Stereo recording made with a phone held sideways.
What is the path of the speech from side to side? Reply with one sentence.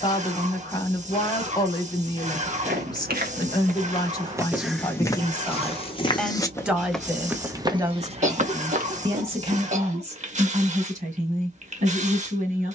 You can hear the speech move to the right.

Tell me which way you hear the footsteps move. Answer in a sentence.
In this clip you hear the footsteps move from right to left and back again.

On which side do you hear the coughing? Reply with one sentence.
You can hear the coughing on the right.